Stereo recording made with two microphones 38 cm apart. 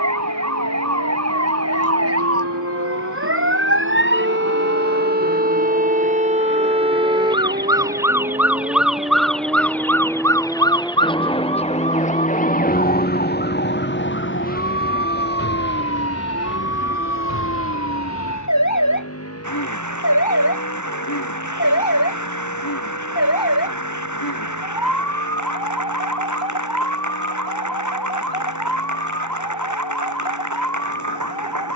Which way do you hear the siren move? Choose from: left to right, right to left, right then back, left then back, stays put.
right to left.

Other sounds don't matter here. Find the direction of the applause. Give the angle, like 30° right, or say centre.
50° right.